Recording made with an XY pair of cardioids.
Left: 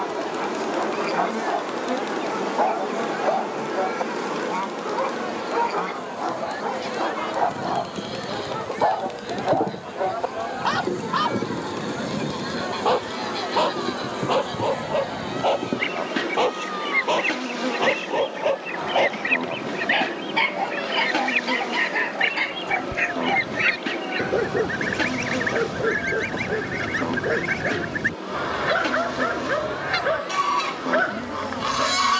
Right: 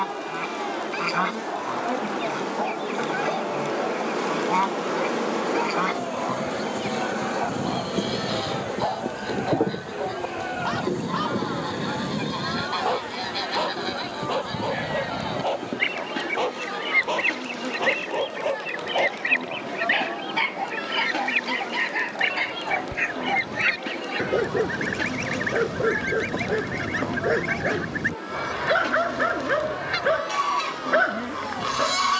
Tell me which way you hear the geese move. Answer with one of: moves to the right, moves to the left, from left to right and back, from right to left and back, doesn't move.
moves to the left.